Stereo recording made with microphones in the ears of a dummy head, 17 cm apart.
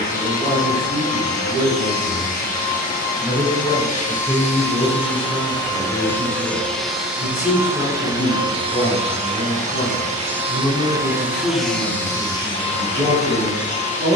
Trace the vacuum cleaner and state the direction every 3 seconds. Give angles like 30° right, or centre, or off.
40° left, 30° left, 10° right, 20° right, 30° left.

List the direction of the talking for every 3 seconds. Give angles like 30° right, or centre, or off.
20° right, centre, 20° left, 20° left, 10° right.